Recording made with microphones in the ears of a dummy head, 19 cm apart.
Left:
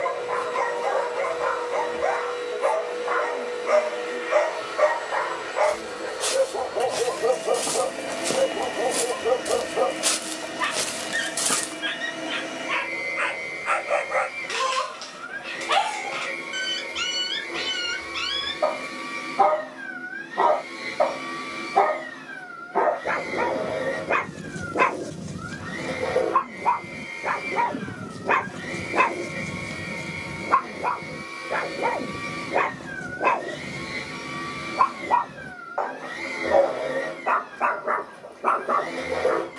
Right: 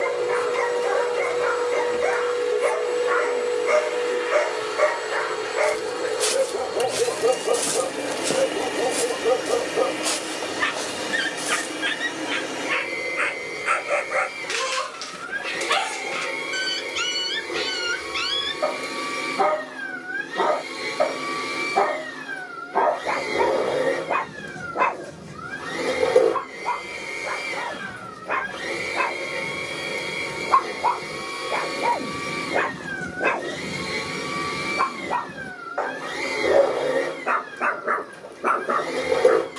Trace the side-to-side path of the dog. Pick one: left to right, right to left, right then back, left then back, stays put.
left then back.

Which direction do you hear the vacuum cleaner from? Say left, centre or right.
right.